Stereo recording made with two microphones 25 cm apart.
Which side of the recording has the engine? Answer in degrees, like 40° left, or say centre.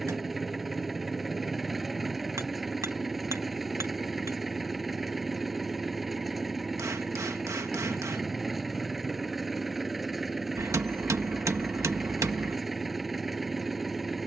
centre.